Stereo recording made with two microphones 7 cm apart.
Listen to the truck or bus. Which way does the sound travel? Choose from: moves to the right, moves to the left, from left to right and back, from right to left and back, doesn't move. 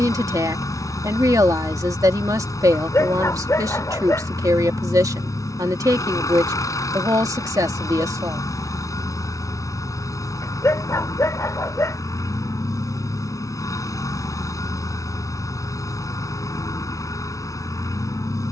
doesn't move.